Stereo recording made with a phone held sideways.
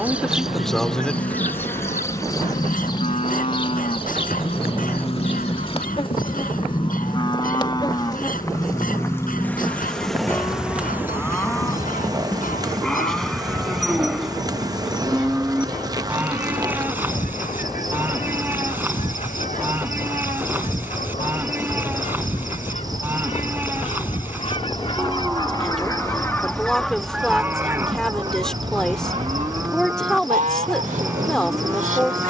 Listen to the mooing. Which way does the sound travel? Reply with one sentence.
In this clip you hear the mooing go from the left side to the right.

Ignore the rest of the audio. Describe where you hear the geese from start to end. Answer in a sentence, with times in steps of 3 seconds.
You can hear the geese on the left from 0 s and on the right from 27 s.